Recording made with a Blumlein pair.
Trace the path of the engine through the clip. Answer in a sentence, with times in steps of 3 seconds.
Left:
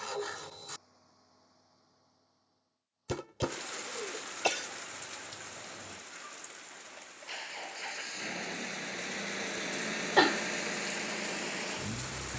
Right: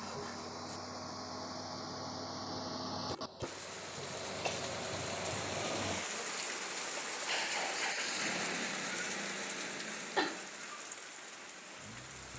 You can hear the engine on the right from 0 s, in the centre from 6 s and on the left from 9 s.